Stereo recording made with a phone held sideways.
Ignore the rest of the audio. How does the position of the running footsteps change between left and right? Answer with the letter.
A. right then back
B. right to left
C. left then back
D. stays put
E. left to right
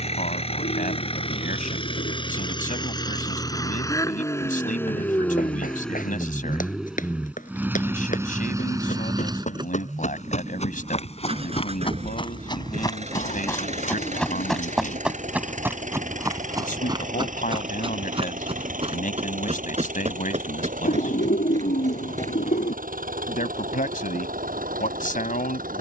E.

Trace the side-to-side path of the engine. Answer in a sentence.
In this clip you hear the engine travel towards the right.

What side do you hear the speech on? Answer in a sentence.
You can hear the speech on the left.